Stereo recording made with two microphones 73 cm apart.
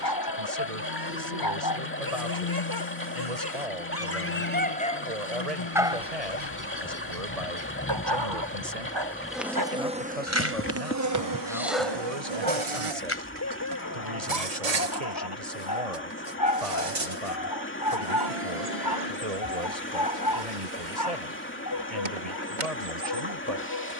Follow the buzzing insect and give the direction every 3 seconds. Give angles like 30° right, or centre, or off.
60° left, 50° left, 20° left, 20° right, 50° right, 60° right, 70° right, 70° right.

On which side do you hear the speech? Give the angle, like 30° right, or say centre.
50° right.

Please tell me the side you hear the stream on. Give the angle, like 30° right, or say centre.
20° left.